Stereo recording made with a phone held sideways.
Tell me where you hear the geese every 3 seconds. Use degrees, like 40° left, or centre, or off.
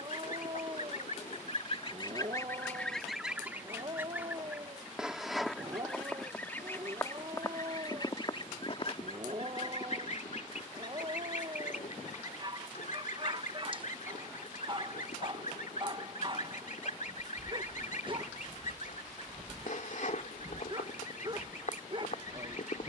50° left, 10° right, 30° left, 60° left, 70° left, 70° left, 70° left, 70° left.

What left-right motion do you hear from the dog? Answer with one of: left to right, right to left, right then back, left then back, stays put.
stays put.